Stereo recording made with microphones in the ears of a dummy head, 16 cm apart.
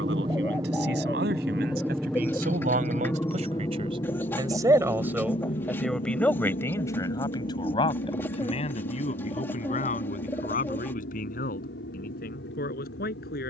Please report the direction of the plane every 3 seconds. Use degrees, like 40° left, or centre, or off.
10° right, 30° left, 50° left, 60° left, 60° left.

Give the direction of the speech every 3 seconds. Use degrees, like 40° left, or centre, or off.
60° right, 20° right, 20° left, 50° left, 50° left.